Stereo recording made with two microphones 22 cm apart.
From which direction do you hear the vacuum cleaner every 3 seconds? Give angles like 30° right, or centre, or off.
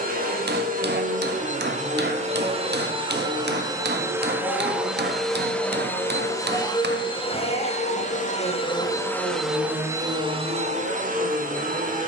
30° right, 10° right, 20° left, 20° right.